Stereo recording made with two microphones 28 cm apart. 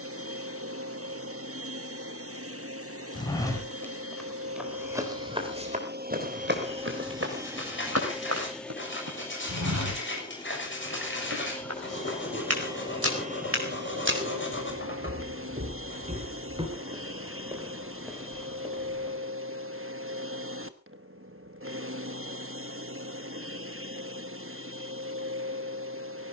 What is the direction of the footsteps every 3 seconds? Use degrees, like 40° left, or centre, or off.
off, centre, 50° right, 70° right, 50° right, 20° right, centre, off, off.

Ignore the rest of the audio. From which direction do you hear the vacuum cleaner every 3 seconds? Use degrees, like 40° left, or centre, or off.
50° right, 50° right, 10° right, 10° left, 30° right, 50° right, 50° right, 50° right, 50° right.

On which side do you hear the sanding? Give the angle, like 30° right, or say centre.
40° left.